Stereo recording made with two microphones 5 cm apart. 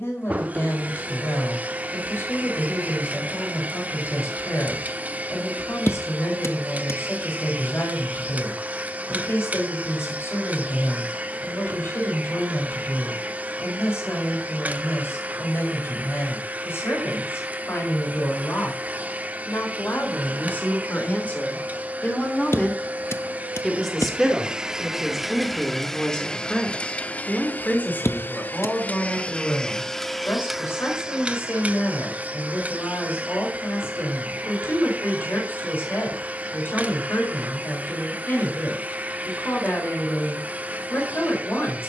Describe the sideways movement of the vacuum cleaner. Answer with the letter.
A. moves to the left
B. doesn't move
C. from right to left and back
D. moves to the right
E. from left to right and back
C.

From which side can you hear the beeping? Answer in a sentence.
You can hear the beeping on the left.